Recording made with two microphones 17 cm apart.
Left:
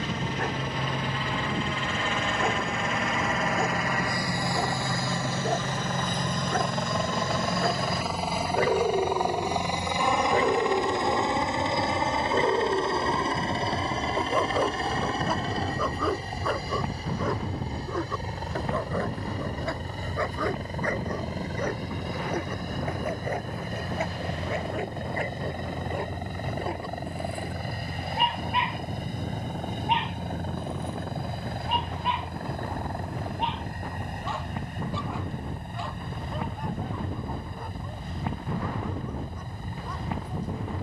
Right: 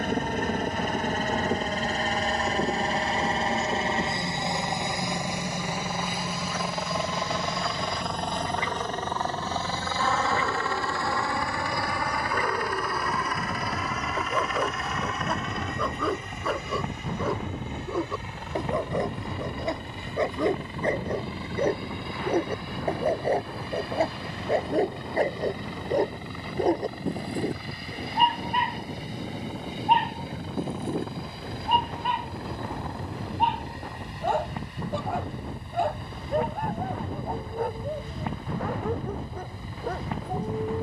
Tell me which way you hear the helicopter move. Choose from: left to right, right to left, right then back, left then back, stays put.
right to left.